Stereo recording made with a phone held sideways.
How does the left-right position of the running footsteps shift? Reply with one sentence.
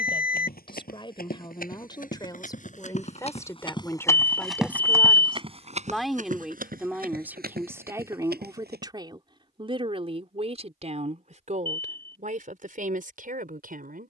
You can hear the running footsteps move from left to right.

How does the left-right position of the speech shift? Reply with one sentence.
You can hear the speech move from left to right.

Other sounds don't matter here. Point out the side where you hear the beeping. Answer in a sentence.
In this clip you hear the beeping on the left.